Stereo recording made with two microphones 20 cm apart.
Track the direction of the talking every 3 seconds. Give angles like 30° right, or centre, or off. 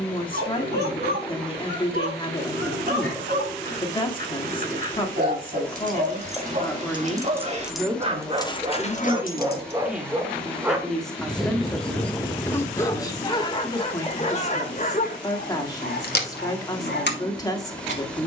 20° left, 20° left, centre, centre, 20° left, 20° left.